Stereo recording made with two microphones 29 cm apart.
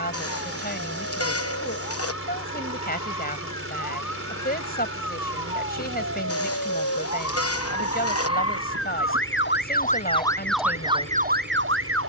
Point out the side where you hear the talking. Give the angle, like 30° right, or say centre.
30° left.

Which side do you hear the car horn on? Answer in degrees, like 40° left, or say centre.
50° left.